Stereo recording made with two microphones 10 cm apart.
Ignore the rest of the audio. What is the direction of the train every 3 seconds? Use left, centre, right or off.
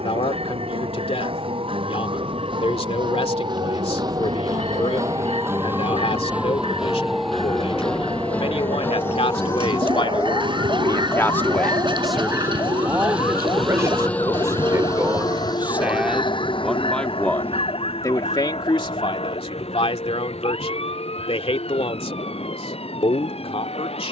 right, right, right, right, centre, left, left, left.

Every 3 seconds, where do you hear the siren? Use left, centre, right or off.
right, right, centre, left, left, left, left, left.